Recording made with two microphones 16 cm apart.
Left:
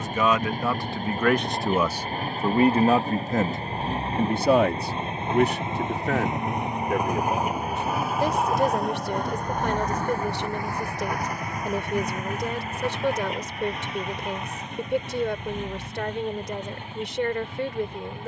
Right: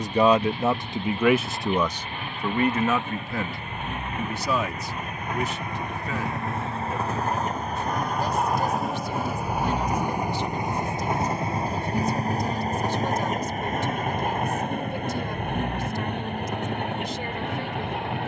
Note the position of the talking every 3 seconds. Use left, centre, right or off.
centre, left, left, left, left, left.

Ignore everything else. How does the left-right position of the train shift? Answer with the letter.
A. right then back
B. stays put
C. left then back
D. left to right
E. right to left
D.